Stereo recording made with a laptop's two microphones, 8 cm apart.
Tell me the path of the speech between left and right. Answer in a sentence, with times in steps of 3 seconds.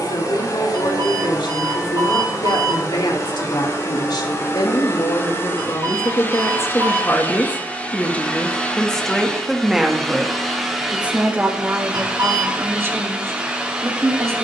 In this clip you hear the speech on the left from 0 s, in the centre from 9 s and on the right from 12 s.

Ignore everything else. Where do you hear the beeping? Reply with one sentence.
In this clip you hear the beeping on the right.